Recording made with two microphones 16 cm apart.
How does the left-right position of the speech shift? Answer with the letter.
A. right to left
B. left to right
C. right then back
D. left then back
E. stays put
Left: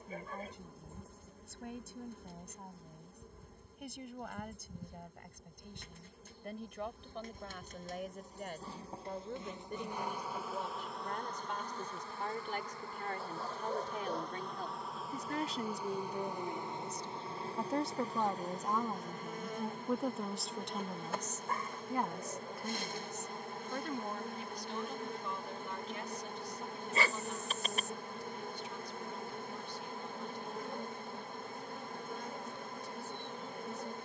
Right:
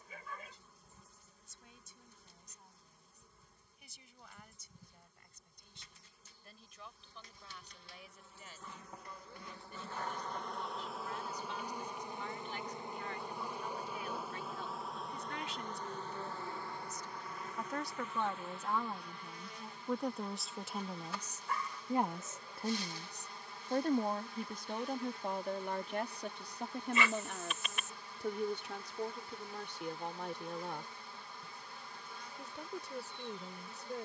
B.